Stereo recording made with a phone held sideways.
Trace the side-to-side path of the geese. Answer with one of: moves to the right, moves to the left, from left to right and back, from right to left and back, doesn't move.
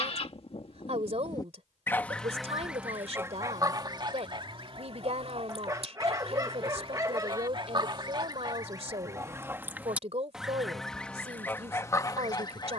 from left to right and back.